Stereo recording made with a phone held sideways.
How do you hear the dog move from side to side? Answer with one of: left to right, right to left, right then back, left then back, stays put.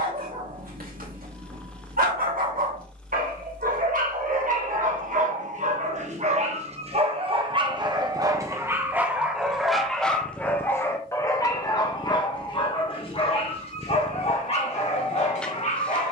right to left.